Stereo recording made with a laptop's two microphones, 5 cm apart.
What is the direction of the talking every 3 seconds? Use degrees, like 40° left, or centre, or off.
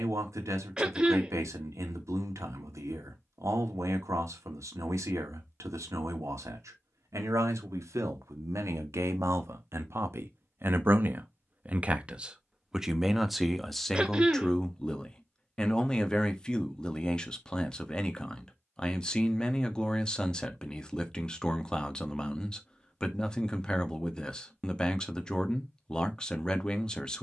80° right, 80° right, 80° right, 50° right, centre, 20° left, 20° left, 20° left, 20° left.